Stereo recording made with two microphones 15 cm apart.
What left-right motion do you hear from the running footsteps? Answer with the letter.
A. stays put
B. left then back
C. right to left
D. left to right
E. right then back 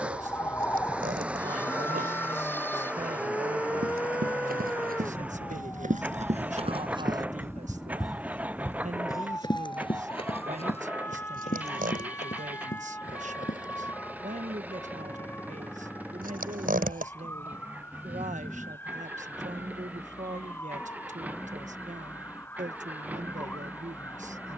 C.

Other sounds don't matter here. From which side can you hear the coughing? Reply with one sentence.
In this clip you hear the coughing on the right.